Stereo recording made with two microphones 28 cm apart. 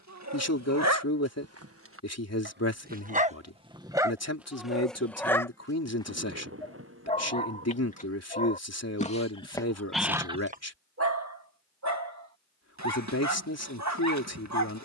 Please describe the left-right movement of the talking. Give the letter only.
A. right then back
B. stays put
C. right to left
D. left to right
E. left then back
B.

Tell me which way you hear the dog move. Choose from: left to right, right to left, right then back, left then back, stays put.
left then back.